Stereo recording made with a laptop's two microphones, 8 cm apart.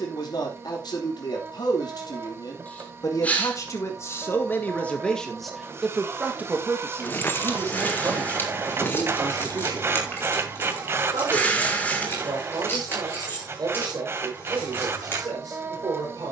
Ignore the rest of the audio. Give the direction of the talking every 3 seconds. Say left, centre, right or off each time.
left, left, right, right, right, right.